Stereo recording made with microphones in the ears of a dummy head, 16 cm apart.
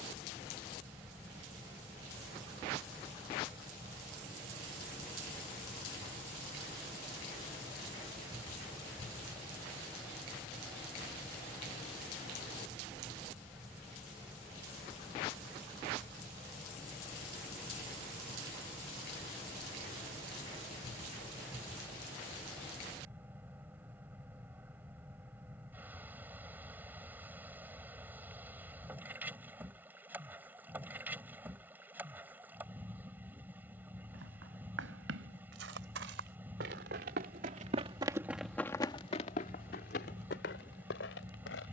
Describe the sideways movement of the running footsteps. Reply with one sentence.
In this clip you hear the running footsteps travel towards the left.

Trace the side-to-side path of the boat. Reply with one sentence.
In this clip you hear the boat stay in one place.